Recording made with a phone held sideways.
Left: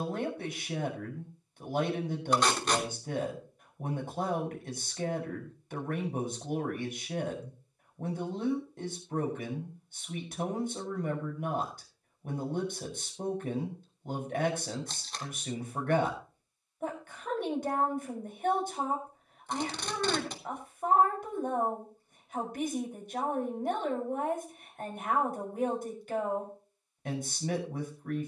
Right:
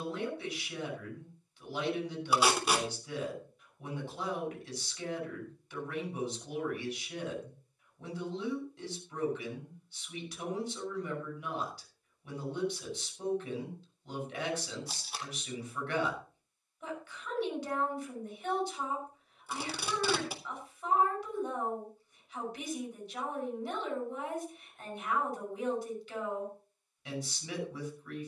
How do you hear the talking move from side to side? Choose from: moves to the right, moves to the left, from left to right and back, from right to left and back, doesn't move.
doesn't move.